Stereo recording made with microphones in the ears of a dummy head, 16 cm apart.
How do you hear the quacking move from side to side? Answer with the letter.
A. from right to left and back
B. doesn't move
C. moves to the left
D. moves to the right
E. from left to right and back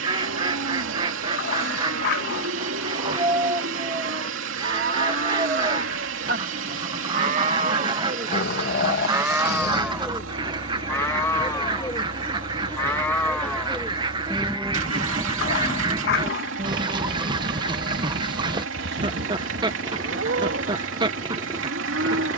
B.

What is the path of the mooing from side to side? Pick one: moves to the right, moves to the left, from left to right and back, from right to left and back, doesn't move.
from right to left and back.